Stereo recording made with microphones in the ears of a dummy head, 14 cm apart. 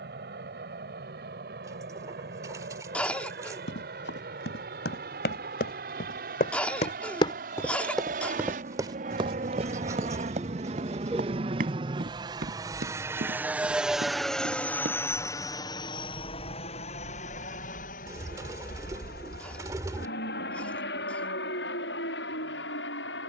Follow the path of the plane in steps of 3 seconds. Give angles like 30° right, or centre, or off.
70° right, 60° right, 60° right, 40° right, 10° right, 30° left, 60° left, 70° left.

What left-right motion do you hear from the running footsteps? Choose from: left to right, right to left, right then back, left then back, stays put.
left to right.